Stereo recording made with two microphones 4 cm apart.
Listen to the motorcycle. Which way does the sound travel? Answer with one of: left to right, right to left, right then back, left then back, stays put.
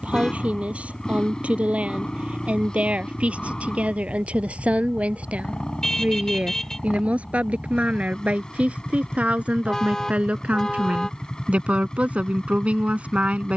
stays put.